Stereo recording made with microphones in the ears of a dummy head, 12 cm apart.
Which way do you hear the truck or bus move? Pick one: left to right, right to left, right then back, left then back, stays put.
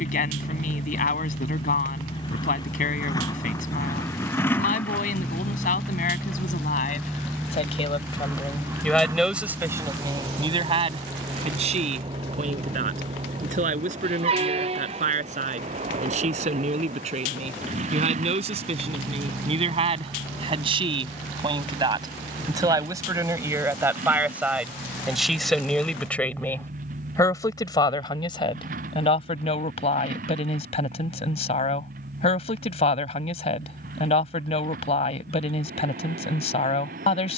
left to right.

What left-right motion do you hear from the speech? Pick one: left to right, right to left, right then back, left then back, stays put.
right then back.